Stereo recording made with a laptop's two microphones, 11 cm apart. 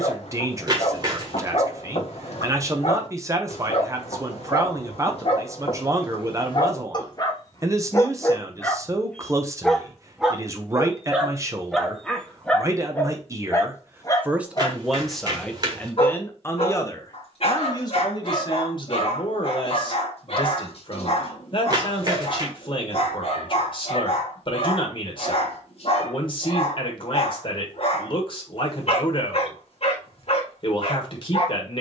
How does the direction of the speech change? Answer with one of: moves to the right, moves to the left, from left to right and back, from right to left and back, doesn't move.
moves to the left.